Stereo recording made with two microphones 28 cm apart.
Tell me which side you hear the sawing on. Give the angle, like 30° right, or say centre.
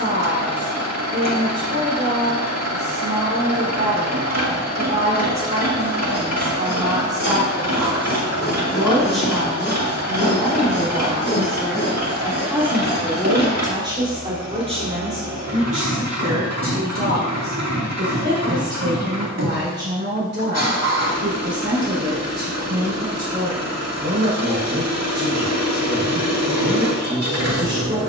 40° left.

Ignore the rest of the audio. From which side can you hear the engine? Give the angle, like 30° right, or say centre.
70° right.